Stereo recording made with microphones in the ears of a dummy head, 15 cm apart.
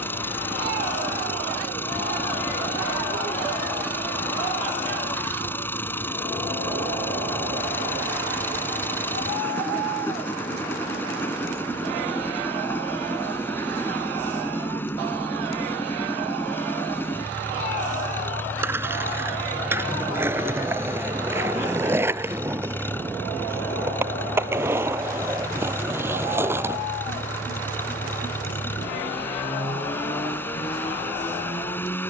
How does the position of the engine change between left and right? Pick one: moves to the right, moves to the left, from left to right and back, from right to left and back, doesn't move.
doesn't move.